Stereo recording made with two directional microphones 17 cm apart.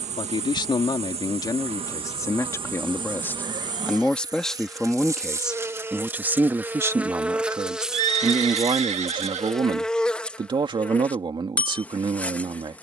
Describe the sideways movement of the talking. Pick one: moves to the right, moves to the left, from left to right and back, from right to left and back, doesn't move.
moves to the right.